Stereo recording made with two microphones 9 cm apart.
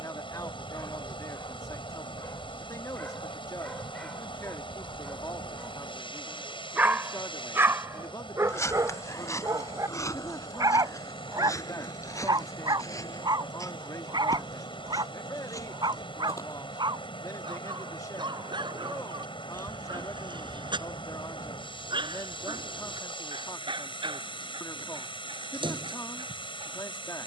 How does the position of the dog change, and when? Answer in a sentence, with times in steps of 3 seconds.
In this clip you hear the dog on the left from 0 s, in the centre from 3 s and on the right from 6 s.